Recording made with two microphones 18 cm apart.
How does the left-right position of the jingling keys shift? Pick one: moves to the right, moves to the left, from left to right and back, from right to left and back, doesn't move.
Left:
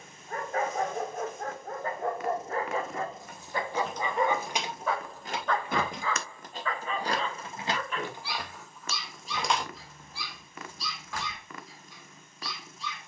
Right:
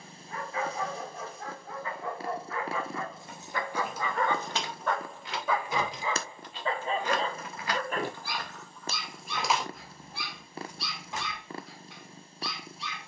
from right to left and back.